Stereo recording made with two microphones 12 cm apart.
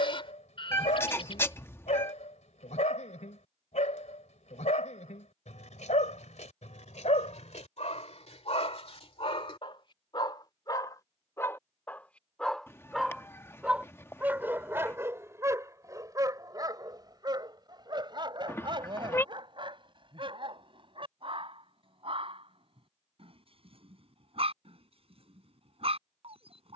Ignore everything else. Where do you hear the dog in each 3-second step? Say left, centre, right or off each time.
left, left, left, left, centre, right, right, right, right.